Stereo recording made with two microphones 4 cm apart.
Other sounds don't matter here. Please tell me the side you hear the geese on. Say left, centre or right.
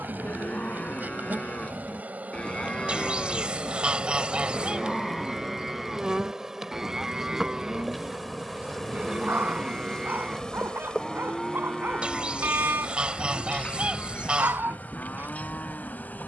right.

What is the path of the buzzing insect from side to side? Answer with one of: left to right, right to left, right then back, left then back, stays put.
right to left.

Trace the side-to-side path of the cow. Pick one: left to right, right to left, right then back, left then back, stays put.
right then back.